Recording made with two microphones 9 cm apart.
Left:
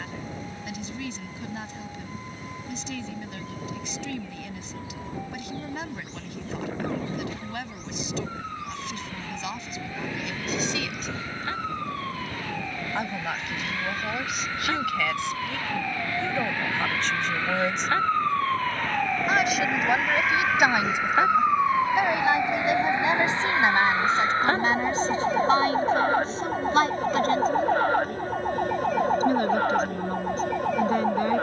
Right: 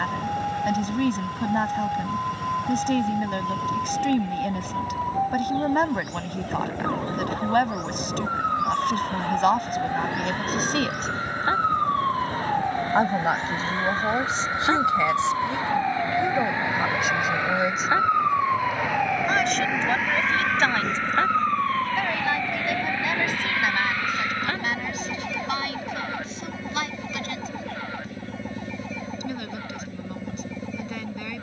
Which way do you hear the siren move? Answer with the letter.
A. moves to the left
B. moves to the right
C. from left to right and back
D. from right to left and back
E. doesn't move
A.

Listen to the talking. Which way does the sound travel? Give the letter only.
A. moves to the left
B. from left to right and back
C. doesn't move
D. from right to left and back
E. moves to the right
A.